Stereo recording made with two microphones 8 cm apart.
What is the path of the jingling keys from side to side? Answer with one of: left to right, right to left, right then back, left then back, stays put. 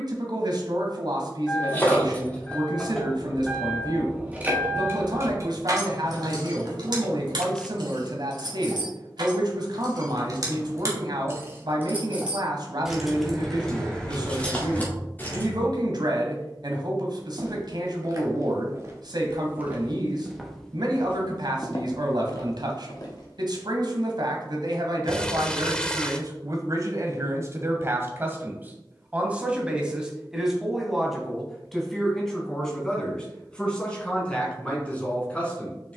right then back.